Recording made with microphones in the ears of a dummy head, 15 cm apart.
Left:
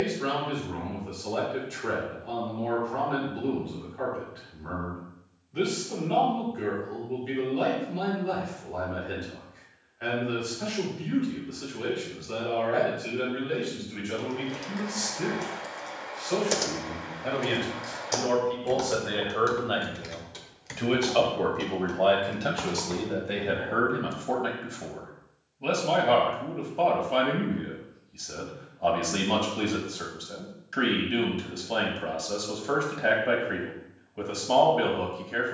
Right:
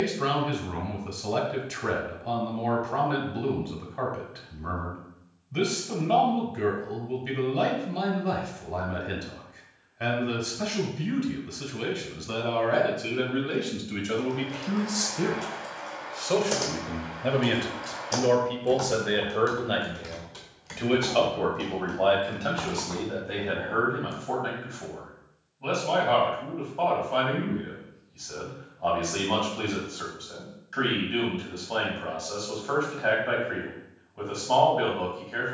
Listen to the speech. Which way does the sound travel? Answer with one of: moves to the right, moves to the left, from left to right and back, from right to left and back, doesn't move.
moves to the left.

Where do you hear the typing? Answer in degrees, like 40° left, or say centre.
10° left.